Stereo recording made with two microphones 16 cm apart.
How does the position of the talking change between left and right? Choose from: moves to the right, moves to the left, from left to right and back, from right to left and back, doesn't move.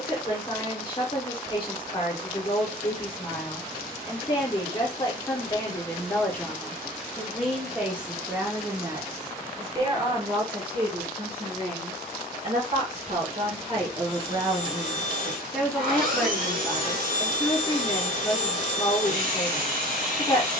from left to right and back.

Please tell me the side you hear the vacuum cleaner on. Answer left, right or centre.
right.